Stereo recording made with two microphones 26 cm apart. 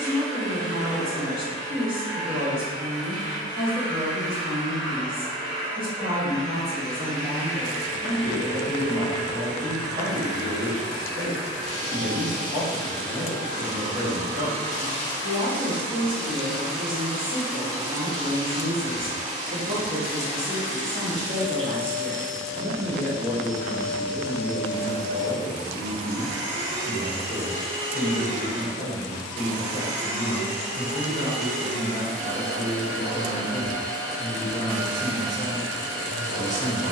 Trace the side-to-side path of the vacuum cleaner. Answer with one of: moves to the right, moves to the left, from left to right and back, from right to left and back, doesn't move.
from left to right and back.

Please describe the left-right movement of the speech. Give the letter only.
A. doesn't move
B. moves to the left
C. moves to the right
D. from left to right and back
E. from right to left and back
B.